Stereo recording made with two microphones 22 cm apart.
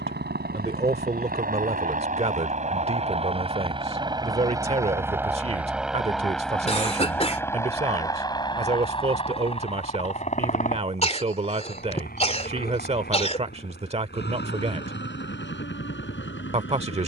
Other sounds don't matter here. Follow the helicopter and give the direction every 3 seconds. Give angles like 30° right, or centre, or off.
40° right, 20° right, 10° left, 30° left, 40° left, 50° left.